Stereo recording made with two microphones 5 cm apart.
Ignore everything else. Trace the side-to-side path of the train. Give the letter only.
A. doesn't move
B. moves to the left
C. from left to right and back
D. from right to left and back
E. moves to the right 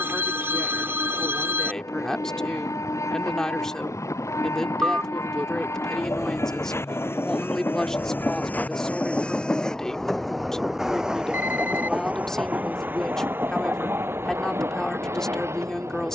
E.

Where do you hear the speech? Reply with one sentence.
In this clip you hear the speech in the centre.